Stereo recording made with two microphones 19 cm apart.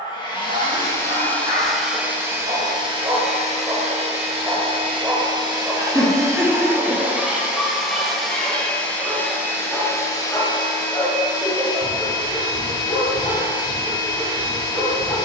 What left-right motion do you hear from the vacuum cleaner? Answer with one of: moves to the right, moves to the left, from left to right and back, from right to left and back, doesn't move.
from left to right and back.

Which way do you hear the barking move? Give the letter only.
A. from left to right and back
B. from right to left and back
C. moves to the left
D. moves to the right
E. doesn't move
C.